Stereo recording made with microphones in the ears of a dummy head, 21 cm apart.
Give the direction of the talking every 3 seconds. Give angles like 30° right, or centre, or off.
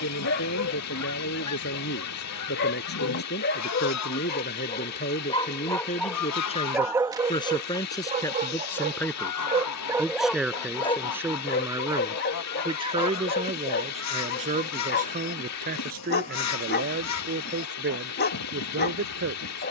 50° left, 40° left, 20° left, 10° right, 30° right, 40° right, 50° right.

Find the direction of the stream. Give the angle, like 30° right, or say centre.
80° left.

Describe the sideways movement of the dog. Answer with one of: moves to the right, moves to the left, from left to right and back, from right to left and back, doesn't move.
from left to right and back.